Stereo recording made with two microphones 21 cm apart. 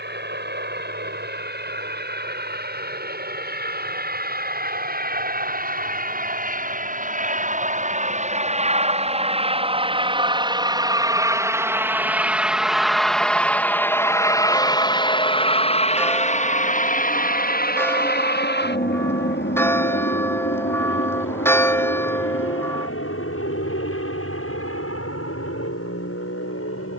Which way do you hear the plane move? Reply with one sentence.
In this clip you hear the plane travel towards the left.